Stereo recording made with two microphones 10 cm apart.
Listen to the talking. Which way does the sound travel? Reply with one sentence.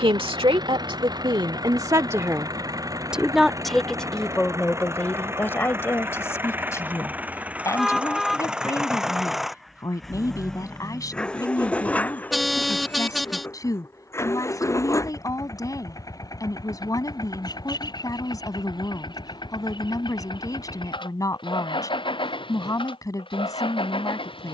You can hear the talking move from right to left.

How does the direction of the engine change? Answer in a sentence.
You can hear the engine go from the right side to the left.